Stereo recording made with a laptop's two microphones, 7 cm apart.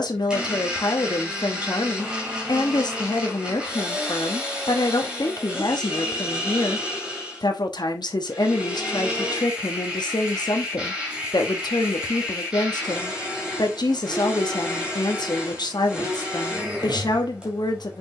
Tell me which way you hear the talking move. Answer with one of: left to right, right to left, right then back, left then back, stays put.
stays put.